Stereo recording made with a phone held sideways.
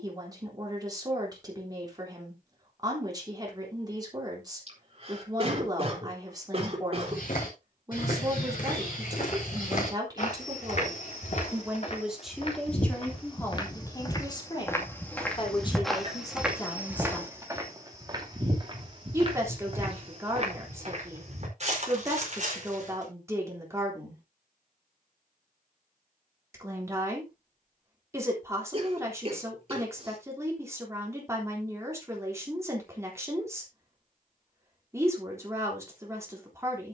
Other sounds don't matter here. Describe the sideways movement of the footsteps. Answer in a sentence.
You can hear the footsteps move from left to right.